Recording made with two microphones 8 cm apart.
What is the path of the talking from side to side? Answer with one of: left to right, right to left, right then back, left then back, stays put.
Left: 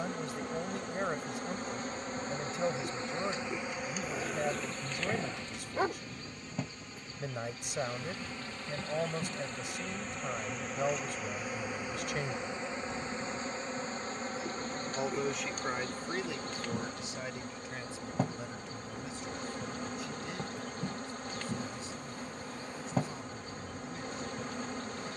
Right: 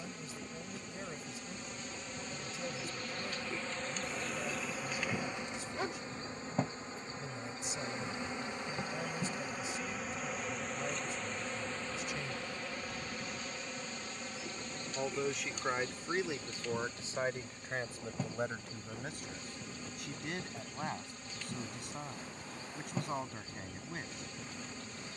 left to right.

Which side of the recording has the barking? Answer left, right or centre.
left.